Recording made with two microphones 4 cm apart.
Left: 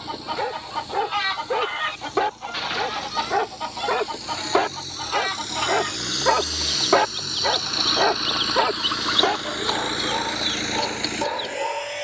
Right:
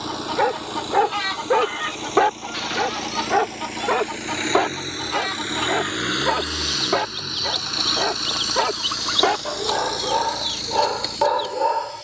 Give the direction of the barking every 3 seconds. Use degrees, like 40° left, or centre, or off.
20° right, centre, 10° left, 30° right.